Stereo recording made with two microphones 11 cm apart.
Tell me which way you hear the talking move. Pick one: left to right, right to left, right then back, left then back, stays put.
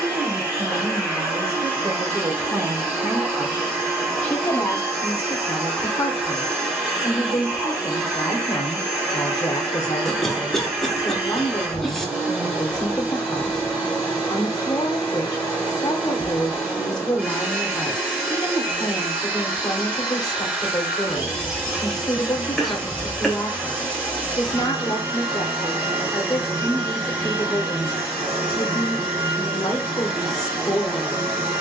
right to left.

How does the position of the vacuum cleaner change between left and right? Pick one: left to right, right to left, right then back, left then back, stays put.
stays put.